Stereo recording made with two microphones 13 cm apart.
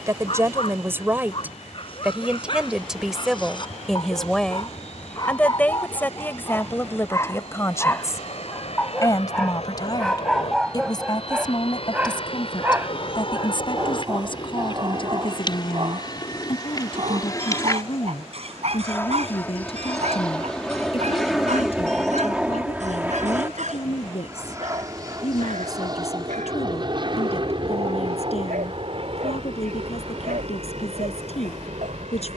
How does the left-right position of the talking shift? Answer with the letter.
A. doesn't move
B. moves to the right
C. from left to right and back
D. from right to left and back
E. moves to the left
E.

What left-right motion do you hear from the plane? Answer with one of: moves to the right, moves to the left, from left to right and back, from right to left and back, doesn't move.
moves to the right.